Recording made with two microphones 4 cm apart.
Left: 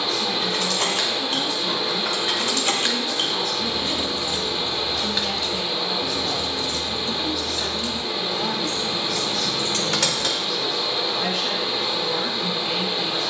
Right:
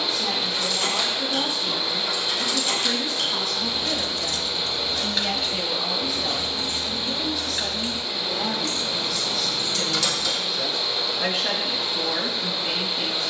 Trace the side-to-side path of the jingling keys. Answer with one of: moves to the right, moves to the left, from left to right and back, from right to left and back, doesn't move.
from left to right and back.